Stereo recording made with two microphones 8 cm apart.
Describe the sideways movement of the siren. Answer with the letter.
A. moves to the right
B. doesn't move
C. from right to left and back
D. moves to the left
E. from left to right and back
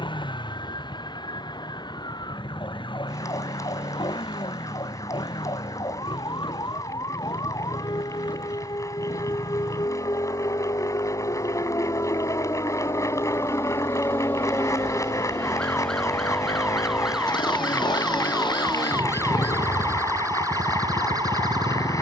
A.